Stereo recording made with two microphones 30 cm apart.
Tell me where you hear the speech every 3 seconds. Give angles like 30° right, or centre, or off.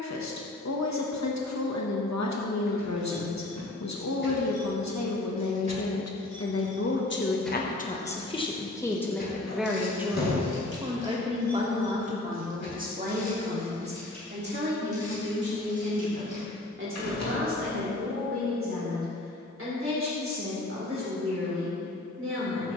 60° left, 60° left, 30° left, 10° right, 30° right, 40° right, 40° right, 40° right.